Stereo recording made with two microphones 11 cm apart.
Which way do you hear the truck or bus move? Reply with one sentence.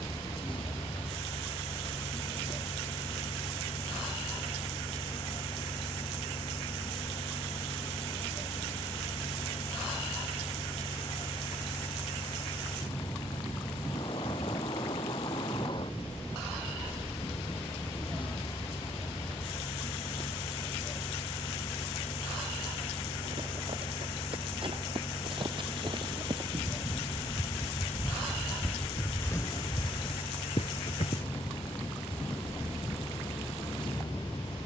You can hear the truck or bus stay in one place.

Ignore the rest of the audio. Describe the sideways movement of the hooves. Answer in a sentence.
In this clip you hear the hooves move to the left.